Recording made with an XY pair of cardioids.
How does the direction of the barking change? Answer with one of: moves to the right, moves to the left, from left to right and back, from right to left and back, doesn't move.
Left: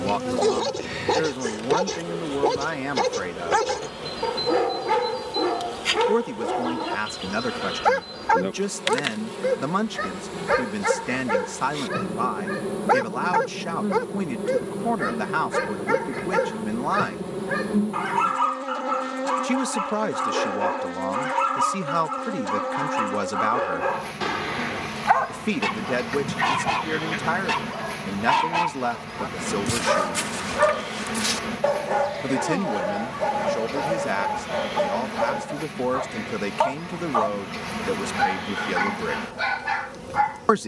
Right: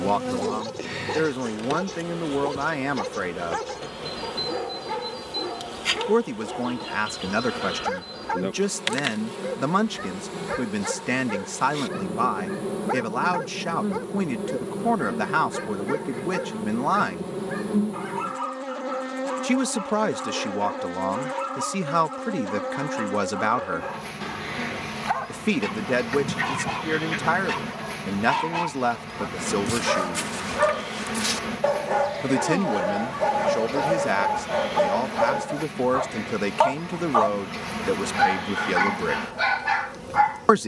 moves to the right.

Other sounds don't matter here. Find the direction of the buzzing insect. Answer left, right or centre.
centre.